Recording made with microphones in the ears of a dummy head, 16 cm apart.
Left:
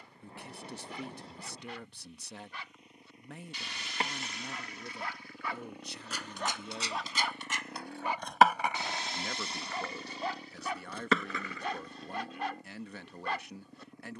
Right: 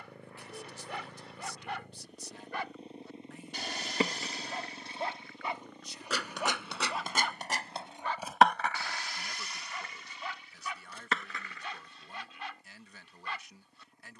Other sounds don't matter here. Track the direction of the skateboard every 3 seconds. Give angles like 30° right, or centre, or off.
off, 70° right, 30° right, 60° left, off.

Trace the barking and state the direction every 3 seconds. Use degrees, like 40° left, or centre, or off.
50° right, 30° right, centre, 30° left, 40° left.